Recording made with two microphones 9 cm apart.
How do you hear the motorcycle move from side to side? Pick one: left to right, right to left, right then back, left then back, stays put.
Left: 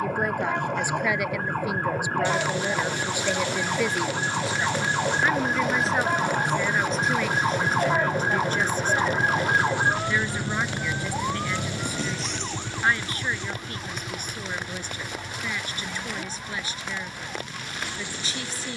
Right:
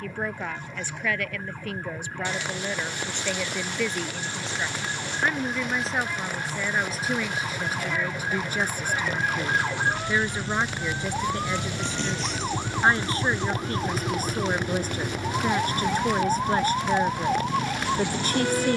left to right.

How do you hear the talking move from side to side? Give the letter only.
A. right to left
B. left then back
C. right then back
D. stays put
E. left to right
E.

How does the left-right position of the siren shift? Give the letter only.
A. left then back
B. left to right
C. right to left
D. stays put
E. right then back
B.